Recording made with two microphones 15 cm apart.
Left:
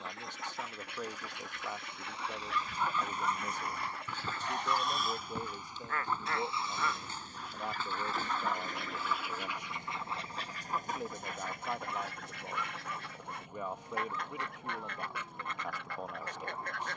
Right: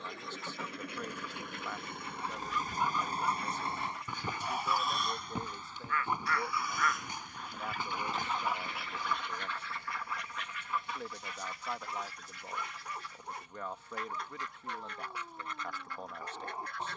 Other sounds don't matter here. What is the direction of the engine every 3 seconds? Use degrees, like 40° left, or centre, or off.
60° right, 10° right, 40° left, 50° left, 60° left, 60° left.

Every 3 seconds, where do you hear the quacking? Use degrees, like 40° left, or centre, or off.
70° left, 70° left, centre, 40° left, 70° left, 70° left.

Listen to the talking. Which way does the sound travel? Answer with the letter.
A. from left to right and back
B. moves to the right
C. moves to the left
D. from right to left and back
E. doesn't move
E.